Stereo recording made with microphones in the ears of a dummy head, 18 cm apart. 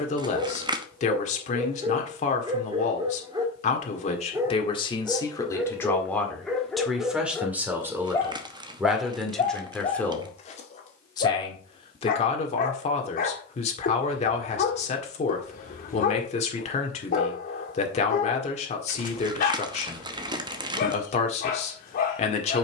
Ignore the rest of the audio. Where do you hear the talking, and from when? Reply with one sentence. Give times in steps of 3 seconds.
You can hear the talking on the left from 0 s, in the centre from 6 s and on the left from 12 s.